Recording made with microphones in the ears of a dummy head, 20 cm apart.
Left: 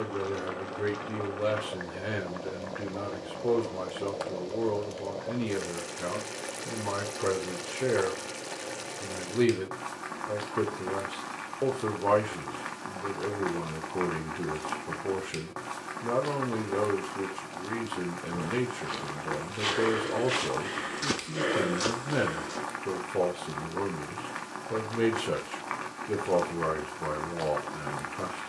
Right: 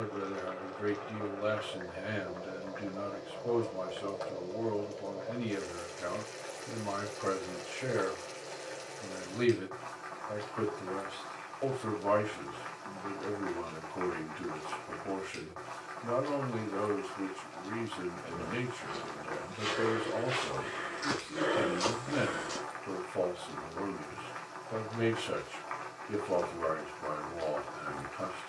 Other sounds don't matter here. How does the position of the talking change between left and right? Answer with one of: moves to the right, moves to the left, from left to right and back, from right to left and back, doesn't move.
doesn't move.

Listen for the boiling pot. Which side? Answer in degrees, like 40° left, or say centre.
70° left.